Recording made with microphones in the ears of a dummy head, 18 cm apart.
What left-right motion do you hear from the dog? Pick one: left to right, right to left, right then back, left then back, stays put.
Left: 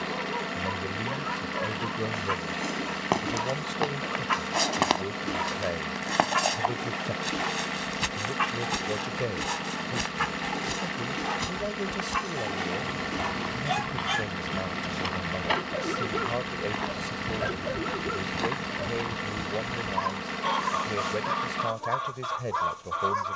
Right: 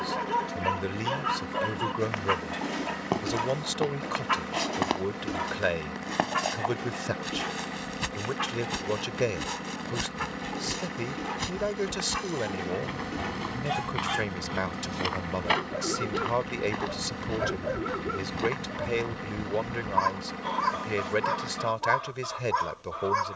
left then back.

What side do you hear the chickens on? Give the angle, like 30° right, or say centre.
40° left.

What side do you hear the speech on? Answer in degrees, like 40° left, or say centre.
50° right.